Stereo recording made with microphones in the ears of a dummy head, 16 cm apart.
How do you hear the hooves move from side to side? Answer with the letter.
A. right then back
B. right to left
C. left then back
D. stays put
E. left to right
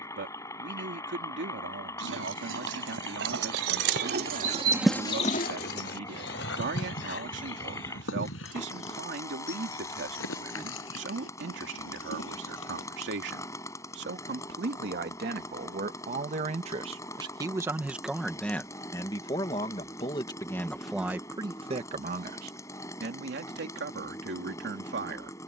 B.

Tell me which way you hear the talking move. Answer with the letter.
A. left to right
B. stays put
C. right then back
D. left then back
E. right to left
D.